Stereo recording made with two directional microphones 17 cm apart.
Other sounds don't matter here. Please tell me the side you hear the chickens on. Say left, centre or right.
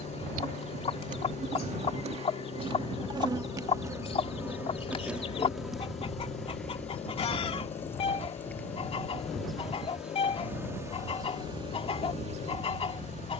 left.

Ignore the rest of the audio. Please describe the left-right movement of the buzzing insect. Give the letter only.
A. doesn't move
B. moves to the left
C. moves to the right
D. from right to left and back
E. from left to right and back
D.